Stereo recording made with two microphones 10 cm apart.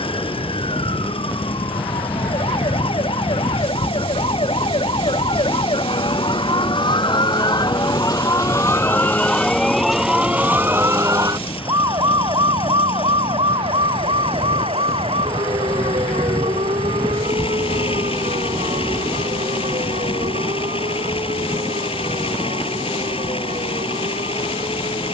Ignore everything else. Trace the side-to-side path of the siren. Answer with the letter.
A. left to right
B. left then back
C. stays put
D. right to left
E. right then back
A.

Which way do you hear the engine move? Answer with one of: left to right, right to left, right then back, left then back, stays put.
stays put.